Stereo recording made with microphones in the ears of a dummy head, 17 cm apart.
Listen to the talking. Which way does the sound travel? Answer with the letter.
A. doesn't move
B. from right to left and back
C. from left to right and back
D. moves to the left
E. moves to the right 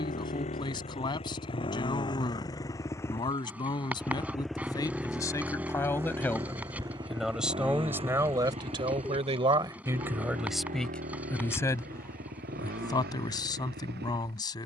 C.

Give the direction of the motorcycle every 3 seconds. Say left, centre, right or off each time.
left, centre, right, right, right.